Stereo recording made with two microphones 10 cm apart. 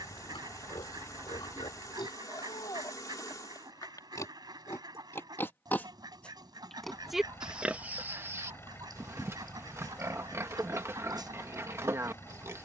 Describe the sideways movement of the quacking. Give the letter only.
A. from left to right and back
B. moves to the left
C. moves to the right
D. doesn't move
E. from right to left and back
D.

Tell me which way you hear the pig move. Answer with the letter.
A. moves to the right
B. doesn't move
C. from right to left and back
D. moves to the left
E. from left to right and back
A.